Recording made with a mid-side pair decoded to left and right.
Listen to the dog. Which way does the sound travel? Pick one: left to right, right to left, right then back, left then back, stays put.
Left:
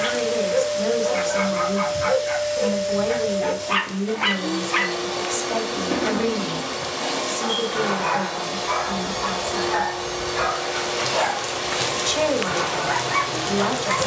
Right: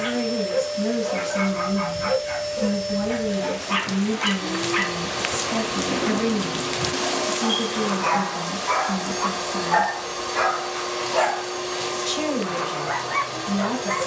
right then back.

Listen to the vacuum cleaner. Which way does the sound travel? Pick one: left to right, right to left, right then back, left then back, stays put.
stays put.